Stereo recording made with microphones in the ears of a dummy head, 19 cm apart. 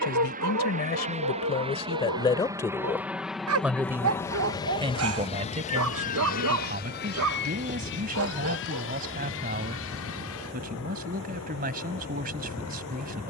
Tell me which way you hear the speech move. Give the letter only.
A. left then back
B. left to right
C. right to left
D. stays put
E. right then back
B.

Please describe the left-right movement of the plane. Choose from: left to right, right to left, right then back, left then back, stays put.
right to left.